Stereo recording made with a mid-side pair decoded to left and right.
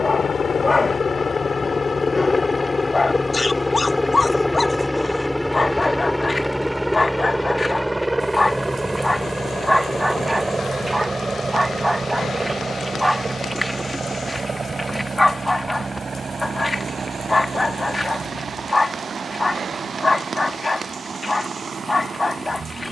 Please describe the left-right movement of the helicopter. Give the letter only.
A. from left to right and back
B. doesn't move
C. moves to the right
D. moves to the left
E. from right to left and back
C.